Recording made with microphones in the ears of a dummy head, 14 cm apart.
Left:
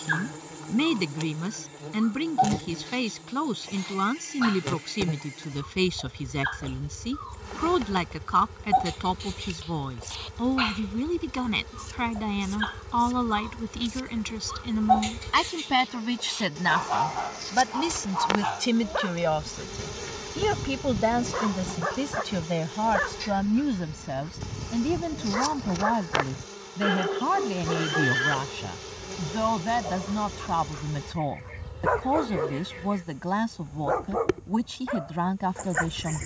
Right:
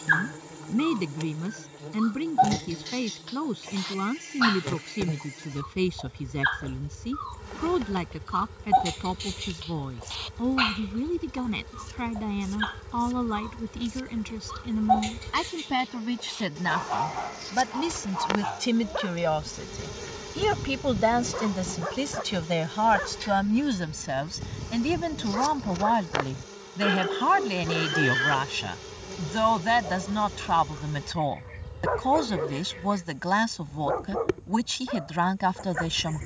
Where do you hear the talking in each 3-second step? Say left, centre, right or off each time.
left, left, left, left, left, left, centre, right, right, right, right, right.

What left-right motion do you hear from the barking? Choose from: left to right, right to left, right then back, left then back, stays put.
right to left.